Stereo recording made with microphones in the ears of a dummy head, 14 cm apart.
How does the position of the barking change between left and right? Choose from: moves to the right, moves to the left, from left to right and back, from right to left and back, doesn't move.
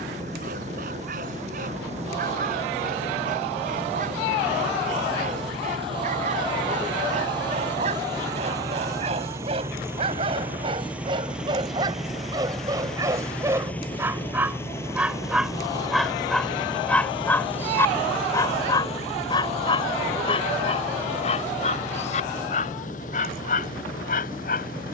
moves to the left.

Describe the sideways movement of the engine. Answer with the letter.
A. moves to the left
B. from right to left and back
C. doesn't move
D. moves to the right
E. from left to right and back
A.